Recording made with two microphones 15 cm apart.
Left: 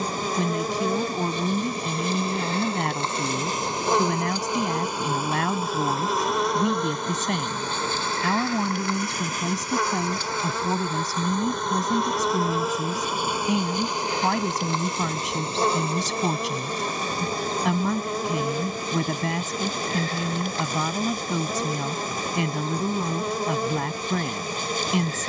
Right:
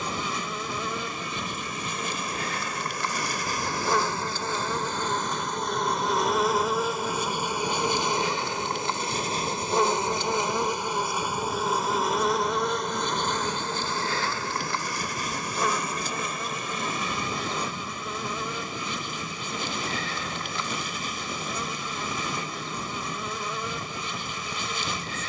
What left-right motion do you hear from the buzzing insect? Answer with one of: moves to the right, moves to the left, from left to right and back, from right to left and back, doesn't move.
from left to right and back.